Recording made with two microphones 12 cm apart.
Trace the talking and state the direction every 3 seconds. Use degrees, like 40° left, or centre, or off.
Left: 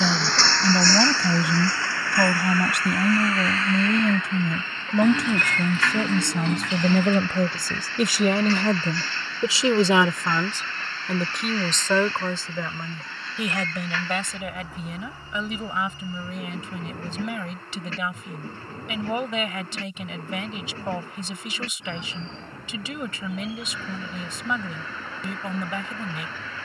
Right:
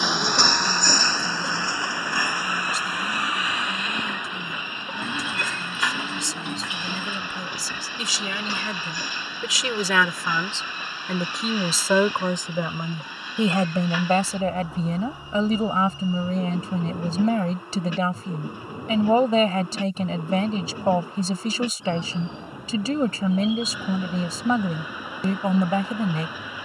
70° left, 70° left, 60° left, 10° left, 30° right, 40° right, 40° right, 40° right, 40° right.